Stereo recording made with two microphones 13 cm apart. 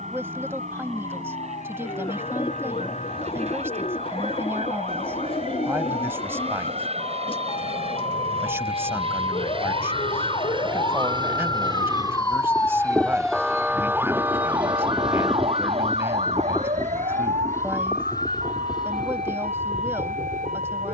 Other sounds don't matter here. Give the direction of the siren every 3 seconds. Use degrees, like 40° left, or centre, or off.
70° left, 70° left, 60° left, 50° left, centre, 60° right, 80° right.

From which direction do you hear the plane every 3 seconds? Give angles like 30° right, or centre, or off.
70° right, 60° right, 60° right, 40° right, 20° right, 10° left, 40° left.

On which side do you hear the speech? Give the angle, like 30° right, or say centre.
20° right.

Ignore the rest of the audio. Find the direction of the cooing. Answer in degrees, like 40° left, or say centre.
40° left.